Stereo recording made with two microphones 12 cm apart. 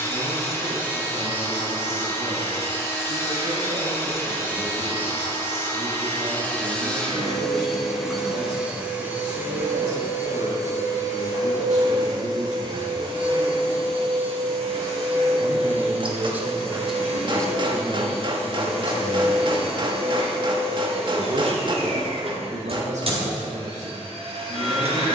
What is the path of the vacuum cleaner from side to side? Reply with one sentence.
In this clip you hear the vacuum cleaner travel towards the right.